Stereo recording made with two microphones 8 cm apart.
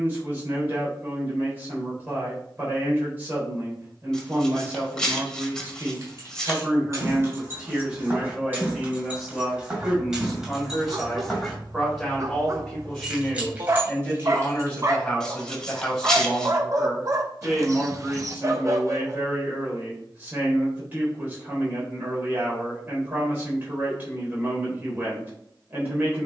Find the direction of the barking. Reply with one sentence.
You can hear the barking on the right.